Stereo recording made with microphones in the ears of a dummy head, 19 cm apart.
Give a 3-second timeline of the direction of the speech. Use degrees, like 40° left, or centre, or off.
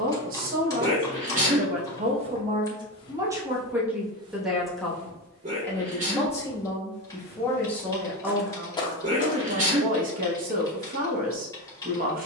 40° right, centre, 10° left, 40° right.